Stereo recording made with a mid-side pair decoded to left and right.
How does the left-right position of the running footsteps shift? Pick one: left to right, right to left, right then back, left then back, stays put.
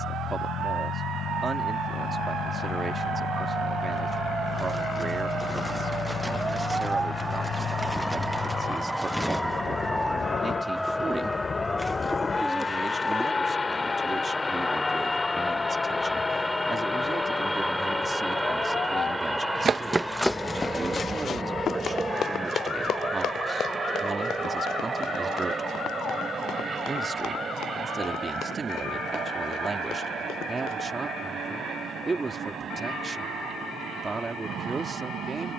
right to left.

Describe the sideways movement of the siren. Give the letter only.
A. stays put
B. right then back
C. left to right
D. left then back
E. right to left
E.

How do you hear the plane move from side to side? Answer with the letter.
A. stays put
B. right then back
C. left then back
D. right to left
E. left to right
E.